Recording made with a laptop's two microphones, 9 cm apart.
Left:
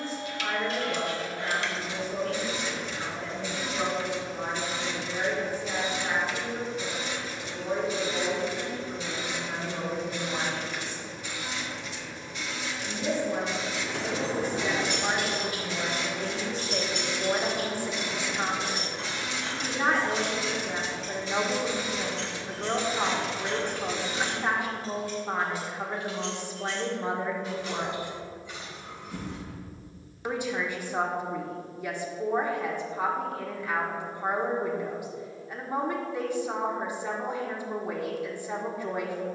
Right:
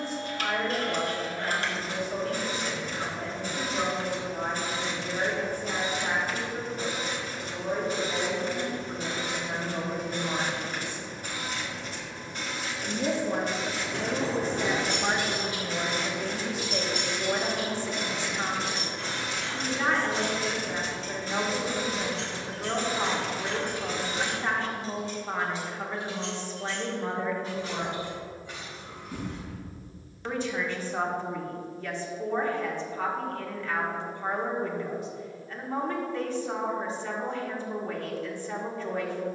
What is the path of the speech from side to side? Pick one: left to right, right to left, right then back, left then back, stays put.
right to left.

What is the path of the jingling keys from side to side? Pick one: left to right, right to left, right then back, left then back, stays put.
left then back.